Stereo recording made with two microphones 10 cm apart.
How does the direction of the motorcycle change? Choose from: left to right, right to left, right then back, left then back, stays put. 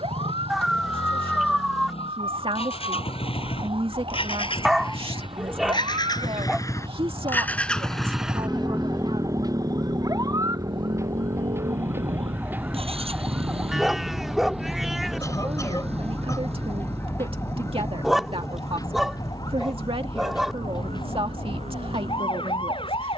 left to right.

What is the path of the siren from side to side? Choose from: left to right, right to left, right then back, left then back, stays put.
right to left.